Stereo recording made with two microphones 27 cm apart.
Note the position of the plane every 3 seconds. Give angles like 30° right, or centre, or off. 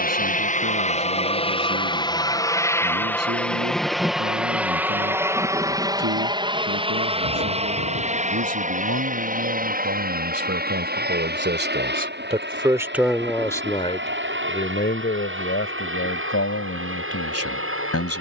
20° left, centre, 20° right, 30° right, 40° right, 50° right.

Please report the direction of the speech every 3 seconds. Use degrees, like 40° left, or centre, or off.
70° right, 70° right, 70° right, 50° right, 10° left, 60° left.